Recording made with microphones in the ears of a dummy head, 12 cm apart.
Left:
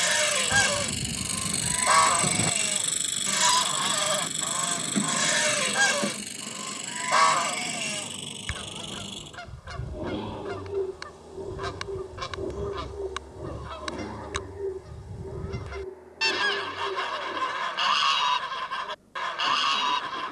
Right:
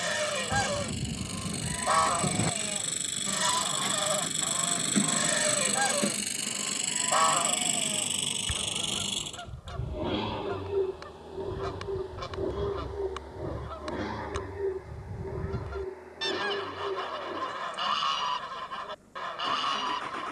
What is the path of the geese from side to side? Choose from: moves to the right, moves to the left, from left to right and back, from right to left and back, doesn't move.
doesn't move.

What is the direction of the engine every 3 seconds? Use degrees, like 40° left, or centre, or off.
40° left, centre, 30° right, 50° right, 60° right, 60° right, 70° right.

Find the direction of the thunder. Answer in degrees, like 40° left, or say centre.
20° left.